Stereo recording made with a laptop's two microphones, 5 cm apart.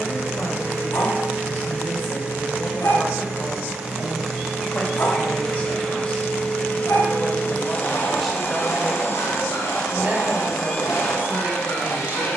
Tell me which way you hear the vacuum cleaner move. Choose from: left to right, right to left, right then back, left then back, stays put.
right to left.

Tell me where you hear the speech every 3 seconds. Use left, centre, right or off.
left, left, centre, right.